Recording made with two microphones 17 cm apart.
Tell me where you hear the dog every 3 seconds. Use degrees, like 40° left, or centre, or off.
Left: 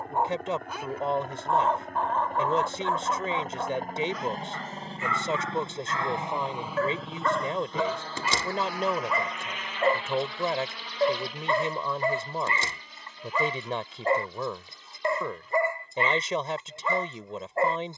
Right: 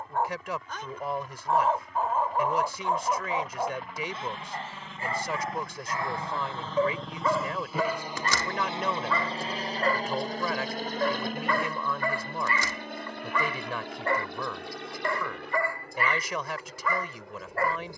centre, 30° right, centre, 20° left, 20° left, 20° left.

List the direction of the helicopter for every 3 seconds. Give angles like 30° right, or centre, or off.
60° left, 40° left, centre, 40° right, 60° right, 70° right.